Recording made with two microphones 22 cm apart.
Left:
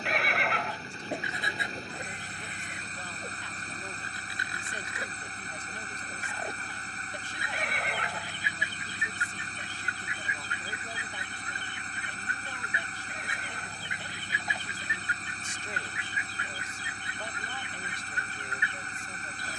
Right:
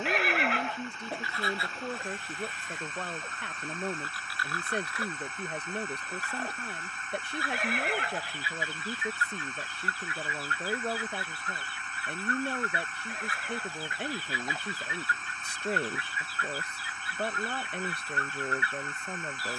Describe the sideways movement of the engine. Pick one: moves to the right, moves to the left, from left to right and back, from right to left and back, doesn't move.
doesn't move.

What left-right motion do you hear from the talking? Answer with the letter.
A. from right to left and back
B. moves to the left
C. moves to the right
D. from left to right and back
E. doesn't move
E.